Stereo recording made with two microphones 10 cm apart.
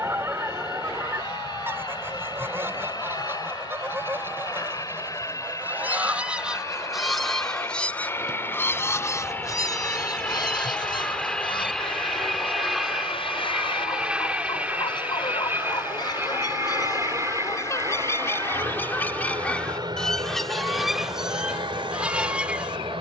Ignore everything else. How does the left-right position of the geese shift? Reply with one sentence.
In this clip you hear the geese move from right to left and back again.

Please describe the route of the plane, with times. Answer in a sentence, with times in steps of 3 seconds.
You can hear the plane on the left from 0 s, in the centre from 9 s and on the right from 15 s.